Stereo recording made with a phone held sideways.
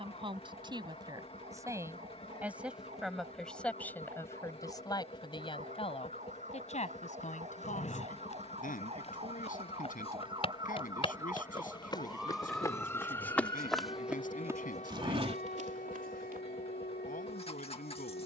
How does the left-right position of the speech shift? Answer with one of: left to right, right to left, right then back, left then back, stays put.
right to left.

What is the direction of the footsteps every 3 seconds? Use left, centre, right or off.
off, off, left, left, centre, right.